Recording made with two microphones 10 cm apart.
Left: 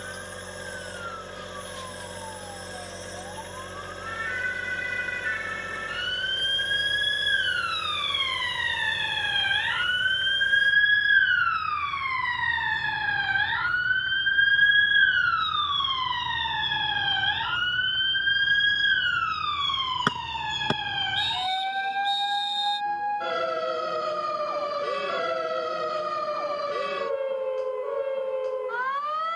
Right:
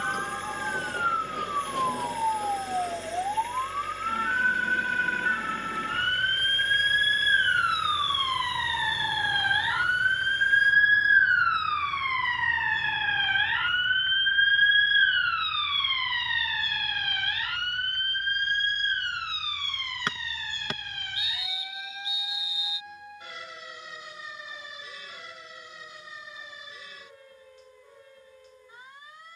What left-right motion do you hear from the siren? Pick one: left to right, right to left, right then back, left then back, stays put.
right to left.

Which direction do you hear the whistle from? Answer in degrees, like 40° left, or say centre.
30° left.